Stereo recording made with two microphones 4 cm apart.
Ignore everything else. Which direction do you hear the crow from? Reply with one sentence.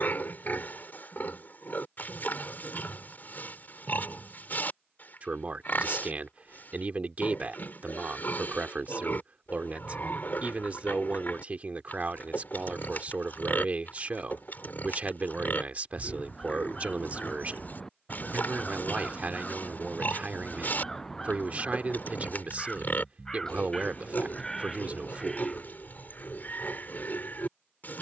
In this clip you hear the crow in the centre.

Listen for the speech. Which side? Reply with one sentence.
In this clip you hear the speech on the right.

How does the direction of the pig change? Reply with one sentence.
In this clip you hear the pig stay in one place.